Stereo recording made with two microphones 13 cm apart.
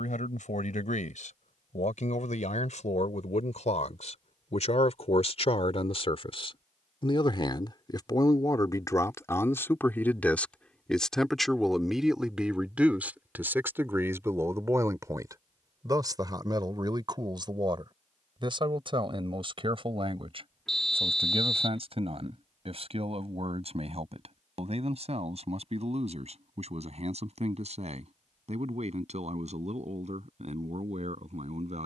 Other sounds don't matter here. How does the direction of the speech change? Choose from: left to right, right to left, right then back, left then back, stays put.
left to right.